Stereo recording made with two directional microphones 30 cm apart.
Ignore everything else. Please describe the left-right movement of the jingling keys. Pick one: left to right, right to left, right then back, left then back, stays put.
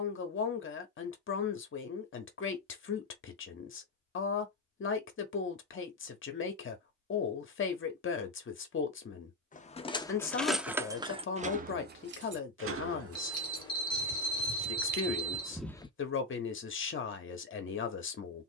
right then back.